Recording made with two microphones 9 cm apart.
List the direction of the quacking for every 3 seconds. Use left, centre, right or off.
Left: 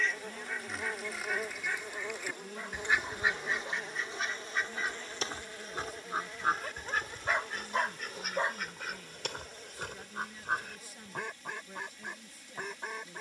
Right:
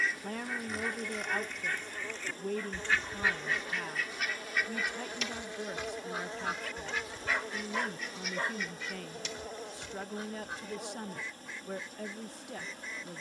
centre, left, left, left, left.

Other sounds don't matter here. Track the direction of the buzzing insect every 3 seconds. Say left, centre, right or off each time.
left, centre, right, right, right.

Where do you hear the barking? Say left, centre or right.
left.